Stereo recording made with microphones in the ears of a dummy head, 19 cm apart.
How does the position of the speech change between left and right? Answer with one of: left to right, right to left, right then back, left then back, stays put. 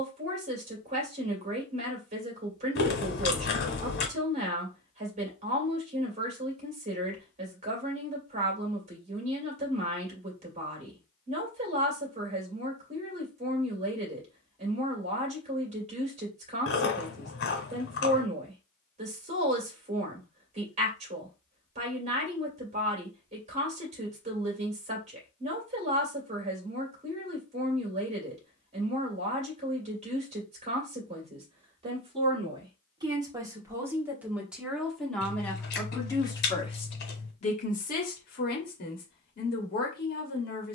right to left.